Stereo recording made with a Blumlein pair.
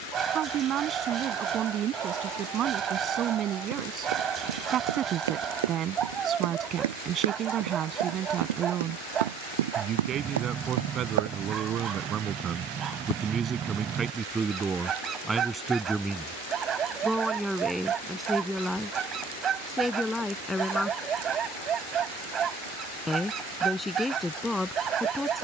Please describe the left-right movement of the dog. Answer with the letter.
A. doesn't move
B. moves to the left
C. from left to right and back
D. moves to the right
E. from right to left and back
A.